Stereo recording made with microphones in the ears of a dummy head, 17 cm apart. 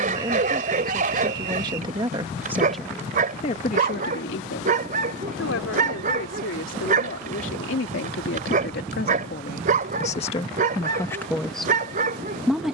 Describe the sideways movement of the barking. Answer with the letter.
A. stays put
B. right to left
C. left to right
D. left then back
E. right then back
A.